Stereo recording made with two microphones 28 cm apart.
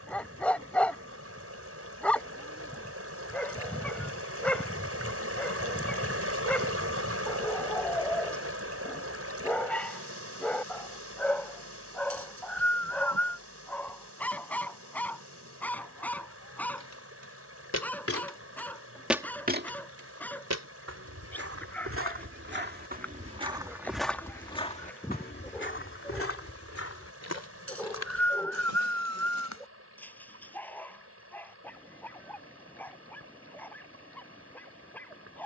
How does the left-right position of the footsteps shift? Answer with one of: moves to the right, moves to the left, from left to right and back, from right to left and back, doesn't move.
from left to right and back.